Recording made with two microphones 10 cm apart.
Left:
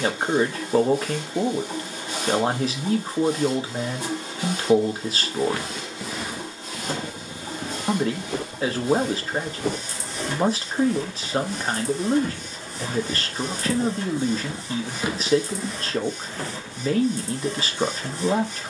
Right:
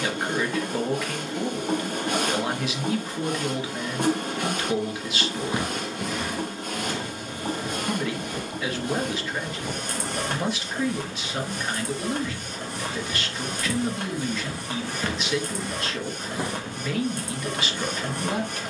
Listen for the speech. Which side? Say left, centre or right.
left.